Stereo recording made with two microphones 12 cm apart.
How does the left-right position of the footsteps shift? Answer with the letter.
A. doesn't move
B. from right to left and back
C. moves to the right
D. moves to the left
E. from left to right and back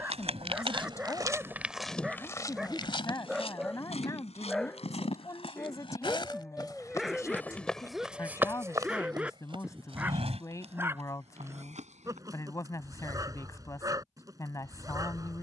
B.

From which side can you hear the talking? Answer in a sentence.
In this clip you hear the talking on the left.